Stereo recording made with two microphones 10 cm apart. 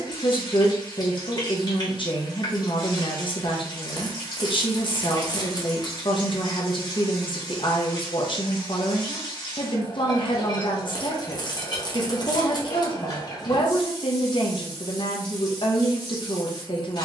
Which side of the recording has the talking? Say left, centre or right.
left.